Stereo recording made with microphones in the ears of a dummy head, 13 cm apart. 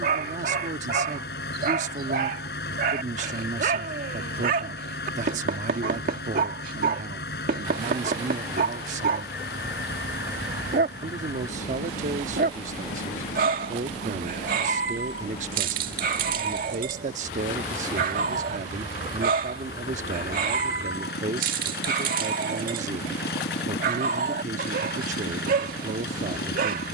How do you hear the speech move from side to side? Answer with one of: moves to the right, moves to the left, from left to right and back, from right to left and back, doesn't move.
doesn't move.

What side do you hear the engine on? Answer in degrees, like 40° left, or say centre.
80° left.